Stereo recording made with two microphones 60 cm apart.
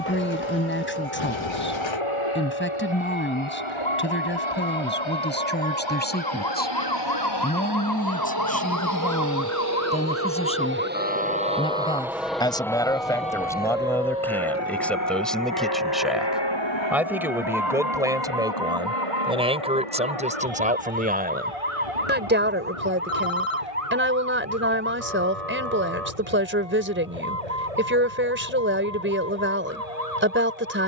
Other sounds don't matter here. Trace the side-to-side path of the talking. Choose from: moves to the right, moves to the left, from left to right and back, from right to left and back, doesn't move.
moves to the right.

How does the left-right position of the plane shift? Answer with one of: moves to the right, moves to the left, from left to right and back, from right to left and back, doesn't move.
moves to the left.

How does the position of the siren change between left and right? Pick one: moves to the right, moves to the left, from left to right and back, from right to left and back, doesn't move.
moves to the right.